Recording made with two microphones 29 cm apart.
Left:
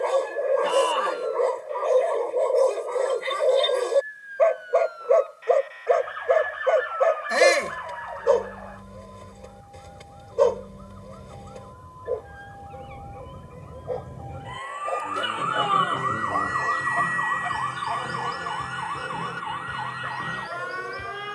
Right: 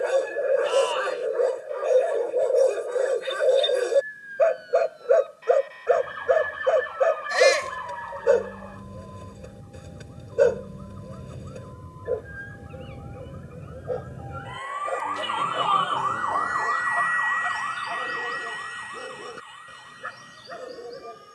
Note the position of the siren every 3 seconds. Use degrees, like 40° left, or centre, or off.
50° right, 50° right, 50° right, 40° right, 10° right, 30° left, 70° left.